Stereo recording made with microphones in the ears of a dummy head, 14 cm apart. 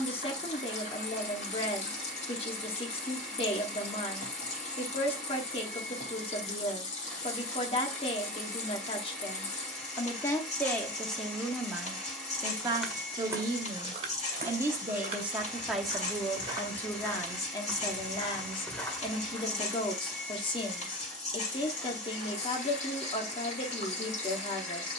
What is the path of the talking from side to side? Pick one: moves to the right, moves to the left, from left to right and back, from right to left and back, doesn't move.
from left to right and back.